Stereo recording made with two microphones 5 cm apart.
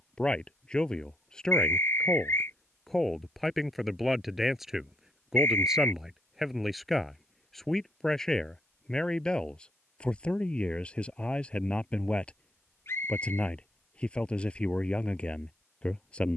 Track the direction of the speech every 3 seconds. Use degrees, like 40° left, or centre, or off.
10° left, centre, centre, 20° left, 20° left, 20° left.